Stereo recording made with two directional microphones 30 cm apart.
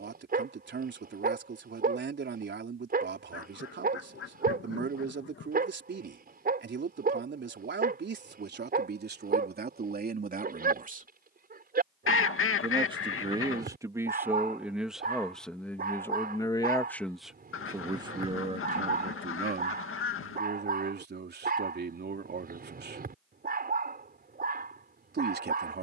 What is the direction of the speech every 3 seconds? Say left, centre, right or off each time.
right, right, right, right, centre, centre, right, right, right.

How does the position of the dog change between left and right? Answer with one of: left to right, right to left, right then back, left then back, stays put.
stays put.